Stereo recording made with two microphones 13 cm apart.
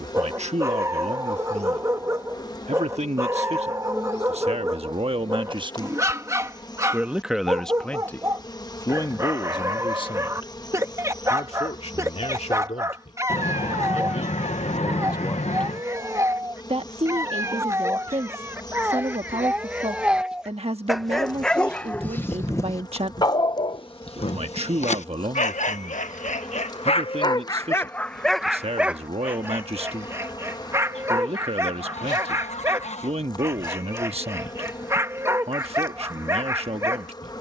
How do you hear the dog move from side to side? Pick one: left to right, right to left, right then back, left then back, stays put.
left then back.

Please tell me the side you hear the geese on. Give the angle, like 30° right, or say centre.
60° left.